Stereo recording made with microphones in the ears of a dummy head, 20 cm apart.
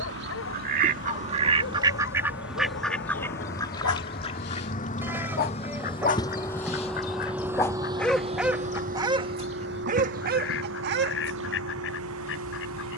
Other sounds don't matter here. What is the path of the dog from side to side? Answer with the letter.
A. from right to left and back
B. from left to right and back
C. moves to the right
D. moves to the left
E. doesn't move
C.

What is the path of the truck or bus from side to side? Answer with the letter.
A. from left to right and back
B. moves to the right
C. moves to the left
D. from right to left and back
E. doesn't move
B.